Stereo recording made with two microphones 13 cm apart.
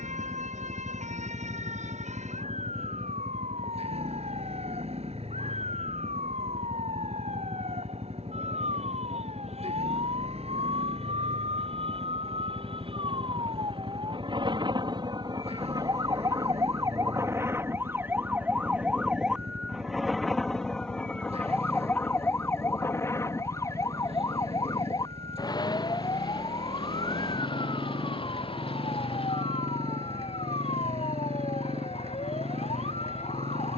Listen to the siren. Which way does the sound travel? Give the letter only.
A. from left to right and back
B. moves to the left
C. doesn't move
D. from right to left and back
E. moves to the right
B.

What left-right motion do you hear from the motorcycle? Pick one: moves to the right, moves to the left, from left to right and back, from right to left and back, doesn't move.
doesn't move.